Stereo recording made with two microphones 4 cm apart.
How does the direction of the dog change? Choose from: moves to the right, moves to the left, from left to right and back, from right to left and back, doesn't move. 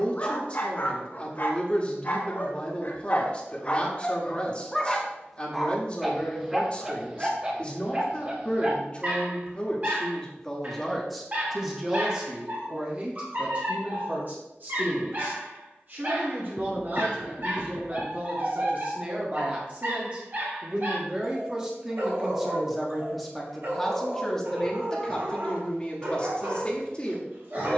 moves to the right.